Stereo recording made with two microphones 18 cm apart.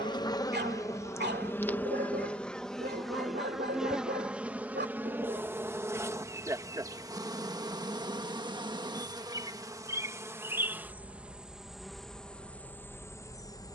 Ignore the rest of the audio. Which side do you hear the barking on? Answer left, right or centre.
right.